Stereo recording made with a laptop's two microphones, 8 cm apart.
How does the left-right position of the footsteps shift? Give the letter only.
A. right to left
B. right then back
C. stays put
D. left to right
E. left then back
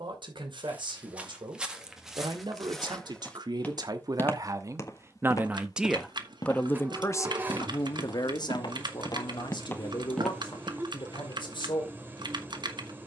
E.